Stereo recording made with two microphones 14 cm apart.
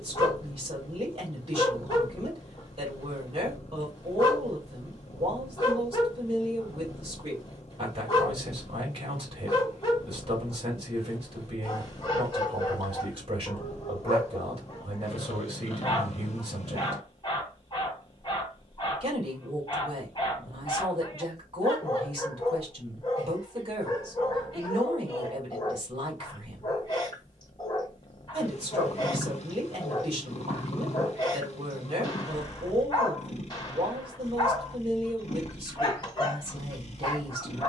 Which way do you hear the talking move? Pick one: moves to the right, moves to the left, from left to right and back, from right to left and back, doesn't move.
doesn't move.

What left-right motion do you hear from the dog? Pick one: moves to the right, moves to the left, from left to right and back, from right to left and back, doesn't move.
doesn't move.